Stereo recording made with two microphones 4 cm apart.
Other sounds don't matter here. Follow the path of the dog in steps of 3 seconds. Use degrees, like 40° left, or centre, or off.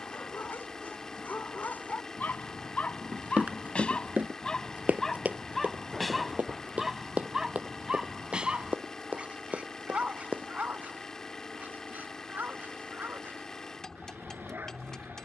50° left, 20° left, 10° right, 40° right, 50° right.